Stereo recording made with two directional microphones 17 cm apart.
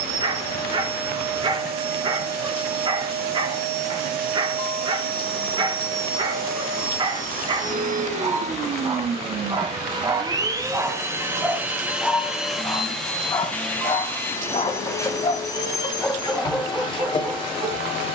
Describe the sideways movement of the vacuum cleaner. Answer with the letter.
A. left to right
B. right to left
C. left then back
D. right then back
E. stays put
B.